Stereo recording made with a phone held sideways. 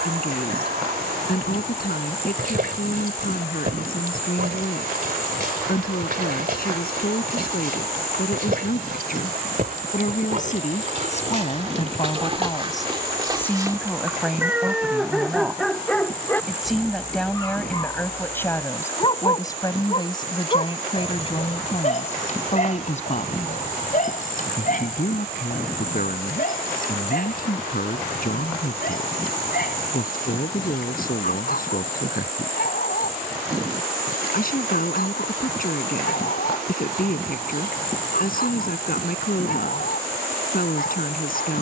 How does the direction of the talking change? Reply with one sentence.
You can hear the talking move from left to right and back again.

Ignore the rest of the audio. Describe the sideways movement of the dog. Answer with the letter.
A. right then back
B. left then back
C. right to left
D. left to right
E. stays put
C.